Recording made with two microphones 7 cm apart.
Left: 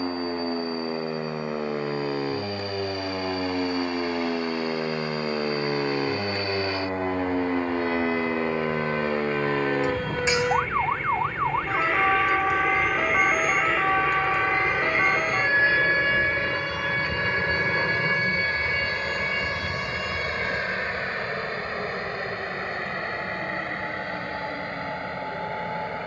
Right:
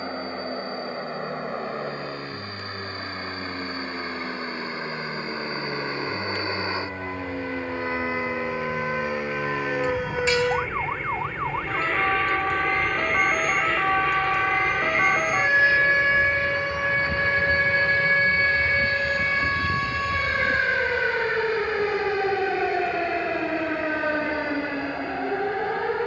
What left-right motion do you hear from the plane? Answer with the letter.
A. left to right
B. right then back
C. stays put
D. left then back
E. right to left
E.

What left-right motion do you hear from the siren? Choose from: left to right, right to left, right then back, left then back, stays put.
left to right.